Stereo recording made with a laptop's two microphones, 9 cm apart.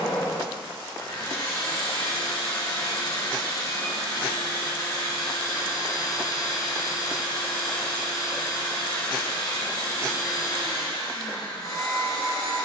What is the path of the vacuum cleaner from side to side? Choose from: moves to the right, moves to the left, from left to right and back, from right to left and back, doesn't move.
doesn't move.